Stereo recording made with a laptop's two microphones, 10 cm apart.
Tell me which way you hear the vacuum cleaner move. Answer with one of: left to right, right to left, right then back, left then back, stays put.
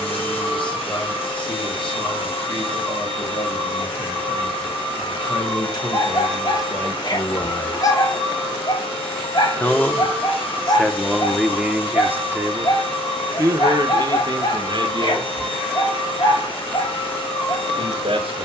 stays put.